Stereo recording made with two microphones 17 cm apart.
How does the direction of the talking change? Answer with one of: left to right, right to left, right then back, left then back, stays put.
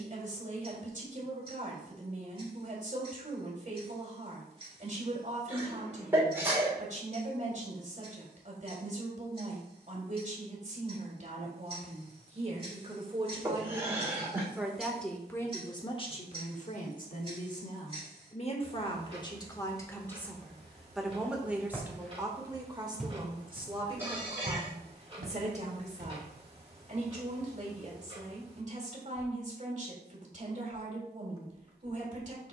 left then back.